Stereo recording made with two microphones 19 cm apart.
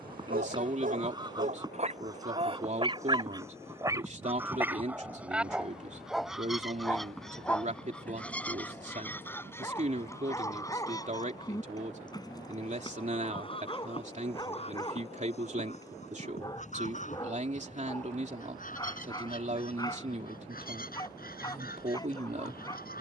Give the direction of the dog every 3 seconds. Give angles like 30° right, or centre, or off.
40° right, 10° right, 10° left, 20° left, 20° left, 20° left, 20° left, 20° left.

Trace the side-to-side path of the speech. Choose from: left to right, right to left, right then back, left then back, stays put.
stays put.